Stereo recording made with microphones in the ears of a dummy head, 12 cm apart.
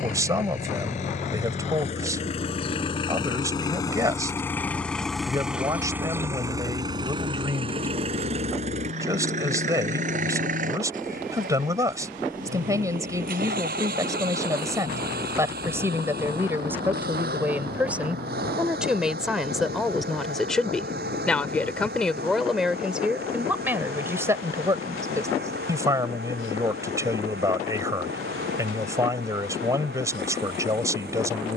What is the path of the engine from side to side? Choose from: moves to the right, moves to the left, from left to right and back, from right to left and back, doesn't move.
moves to the right.